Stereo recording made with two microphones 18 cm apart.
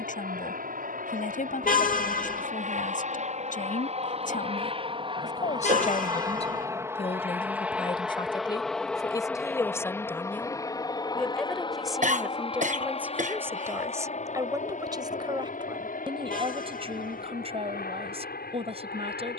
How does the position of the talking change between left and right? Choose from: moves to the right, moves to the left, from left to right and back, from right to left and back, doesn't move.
moves to the right.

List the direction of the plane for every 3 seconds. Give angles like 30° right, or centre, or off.
50° right, 30° right, 10° right, 20° left, 30° left, 50° left, 50° left.